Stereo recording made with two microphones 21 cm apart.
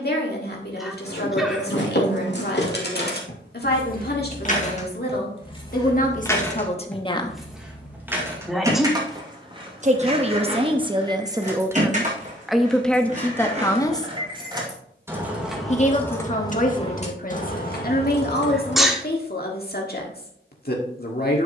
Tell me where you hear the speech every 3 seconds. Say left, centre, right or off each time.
left, left, left, right, centre, left, left.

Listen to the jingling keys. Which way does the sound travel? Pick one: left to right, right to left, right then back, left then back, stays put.
right then back.